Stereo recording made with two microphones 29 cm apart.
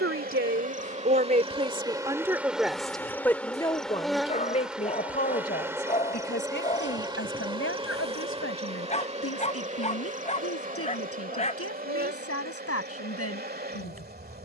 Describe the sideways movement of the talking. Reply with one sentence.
In this clip you hear the talking go from the right side to the left.